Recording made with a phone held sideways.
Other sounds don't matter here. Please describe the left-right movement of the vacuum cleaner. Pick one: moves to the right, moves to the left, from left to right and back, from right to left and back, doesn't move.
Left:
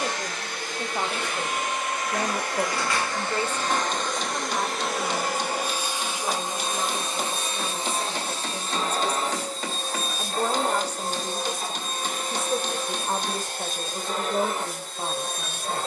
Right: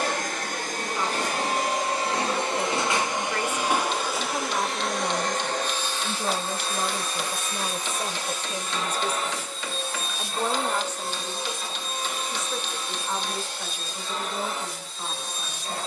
moves to the left.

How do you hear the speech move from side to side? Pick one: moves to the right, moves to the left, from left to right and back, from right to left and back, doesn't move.
from left to right and back.